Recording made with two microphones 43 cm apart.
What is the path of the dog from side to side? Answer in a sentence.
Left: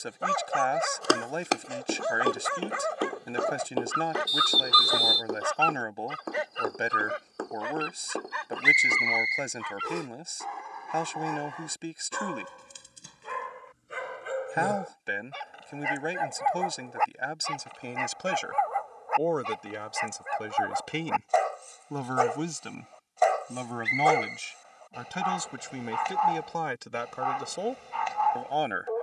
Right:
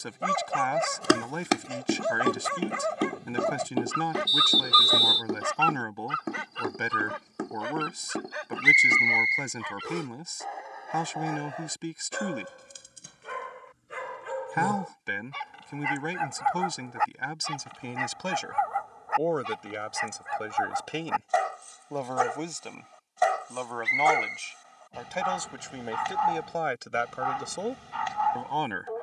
In this clip you hear the dog move from right to left and back again.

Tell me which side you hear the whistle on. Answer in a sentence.
In this clip you hear the whistle in the centre.